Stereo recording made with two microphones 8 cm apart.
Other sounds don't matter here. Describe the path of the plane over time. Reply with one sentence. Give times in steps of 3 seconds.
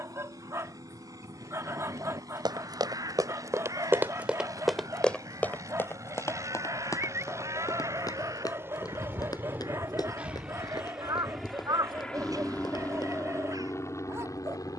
You can hear the plane on the right from 0 s, in the centre from 9 s and on the left from 12 s.